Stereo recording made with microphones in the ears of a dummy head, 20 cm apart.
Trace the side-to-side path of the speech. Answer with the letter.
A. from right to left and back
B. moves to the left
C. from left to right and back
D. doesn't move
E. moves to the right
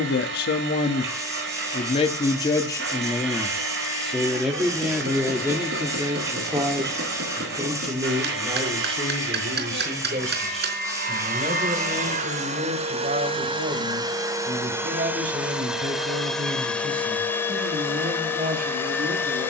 E.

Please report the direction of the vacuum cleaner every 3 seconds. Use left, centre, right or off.
right, right, right, right, right, centre, centre.